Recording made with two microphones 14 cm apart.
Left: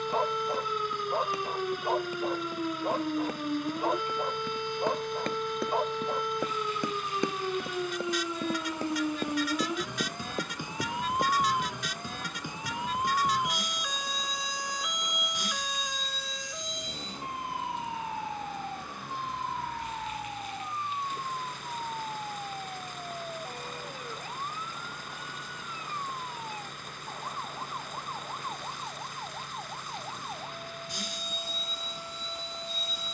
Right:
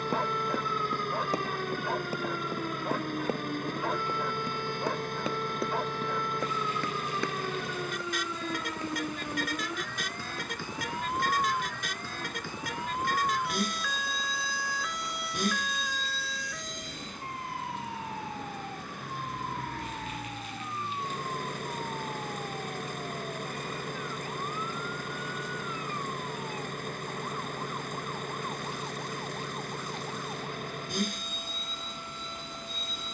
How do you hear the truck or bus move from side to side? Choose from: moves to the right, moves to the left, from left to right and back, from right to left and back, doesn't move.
doesn't move.